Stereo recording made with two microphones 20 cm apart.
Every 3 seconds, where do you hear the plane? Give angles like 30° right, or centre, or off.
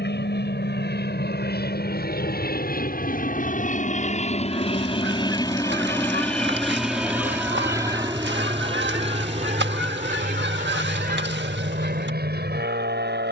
60° left, 30° left, 10° right, 40° right, 50° right.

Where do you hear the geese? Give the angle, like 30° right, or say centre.
70° right.